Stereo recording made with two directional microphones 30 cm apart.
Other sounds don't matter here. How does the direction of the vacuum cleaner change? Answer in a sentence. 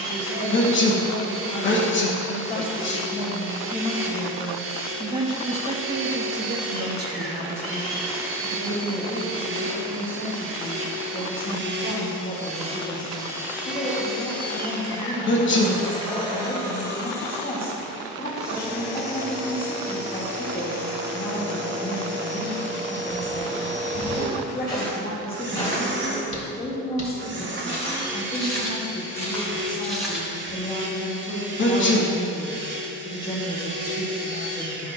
You can hear the vacuum cleaner go left and come back.